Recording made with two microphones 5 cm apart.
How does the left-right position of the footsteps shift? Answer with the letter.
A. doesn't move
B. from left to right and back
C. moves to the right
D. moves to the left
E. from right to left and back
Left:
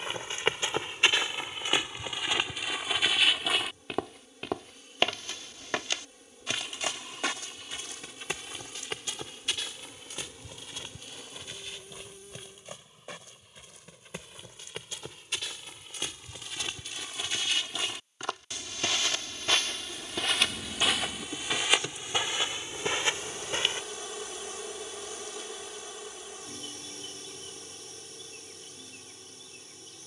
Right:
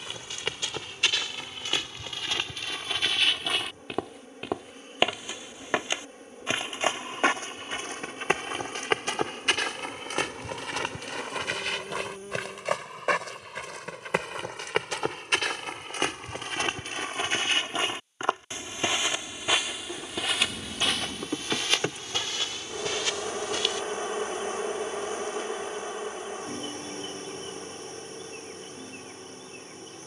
B.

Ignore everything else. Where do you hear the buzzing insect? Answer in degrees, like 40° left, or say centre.
40° right.